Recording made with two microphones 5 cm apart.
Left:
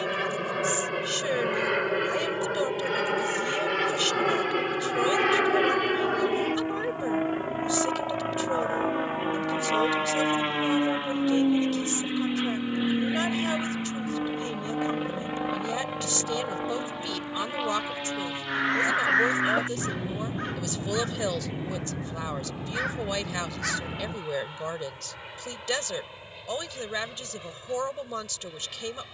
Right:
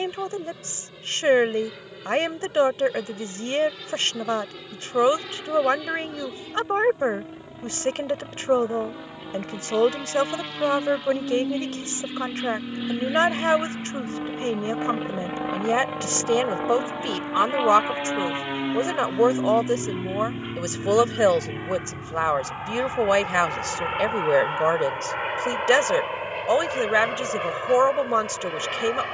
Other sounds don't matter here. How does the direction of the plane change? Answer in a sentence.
You can hear the plane move from left to right.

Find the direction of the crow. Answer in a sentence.
In this clip you hear the crow on the left.